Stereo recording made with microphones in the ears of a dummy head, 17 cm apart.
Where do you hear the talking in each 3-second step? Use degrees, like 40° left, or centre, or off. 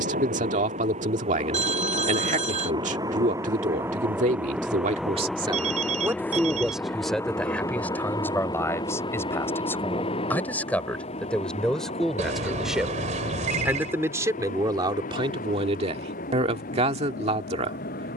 40° right, 40° right, centre, 10° left, 10° right, 30° right.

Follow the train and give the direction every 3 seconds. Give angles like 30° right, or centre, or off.
30° right, 10° right, 20° left, 30° left, 40° left, 50° left.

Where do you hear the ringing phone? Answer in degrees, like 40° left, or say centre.
40° right.